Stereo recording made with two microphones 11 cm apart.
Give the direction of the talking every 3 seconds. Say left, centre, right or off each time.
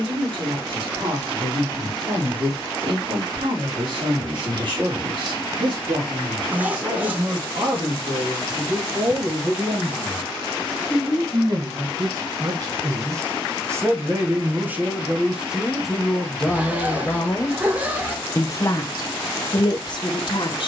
right, right, right, right, right, centre, left.